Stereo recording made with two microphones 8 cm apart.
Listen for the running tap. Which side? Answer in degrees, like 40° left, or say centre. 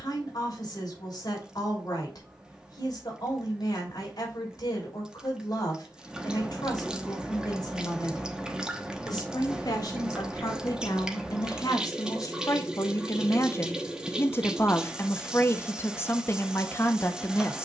10° right.